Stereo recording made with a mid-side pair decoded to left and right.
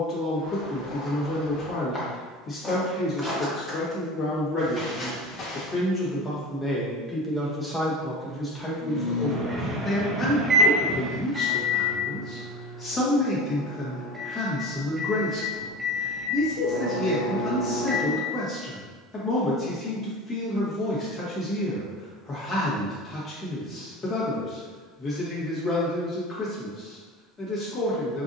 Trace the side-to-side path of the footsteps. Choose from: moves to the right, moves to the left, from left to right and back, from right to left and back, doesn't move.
from left to right and back.